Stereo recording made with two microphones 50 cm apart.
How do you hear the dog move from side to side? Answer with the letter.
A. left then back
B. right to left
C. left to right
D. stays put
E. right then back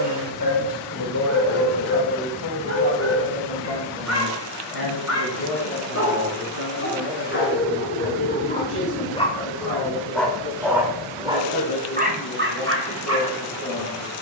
C.